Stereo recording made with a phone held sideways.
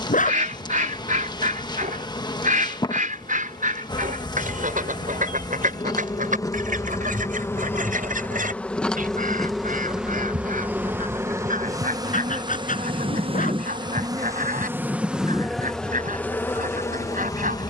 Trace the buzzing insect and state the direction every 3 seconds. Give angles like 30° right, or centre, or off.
30° left, 30° left, 20° left, 10° right, 30° right, 10° left.